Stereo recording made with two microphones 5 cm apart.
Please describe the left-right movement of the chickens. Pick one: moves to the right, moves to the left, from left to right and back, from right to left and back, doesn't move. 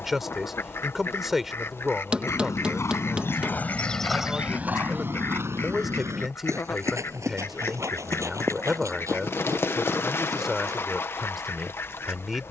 doesn't move.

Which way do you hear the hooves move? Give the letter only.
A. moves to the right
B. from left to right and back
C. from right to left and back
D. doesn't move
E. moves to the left
A.